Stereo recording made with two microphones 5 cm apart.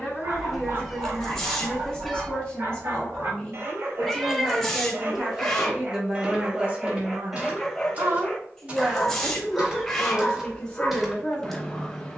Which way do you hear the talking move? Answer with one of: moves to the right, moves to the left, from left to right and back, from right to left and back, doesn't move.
from left to right and back.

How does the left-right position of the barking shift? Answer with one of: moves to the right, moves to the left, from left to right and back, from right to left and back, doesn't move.
moves to the left.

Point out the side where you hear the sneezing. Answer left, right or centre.
centre.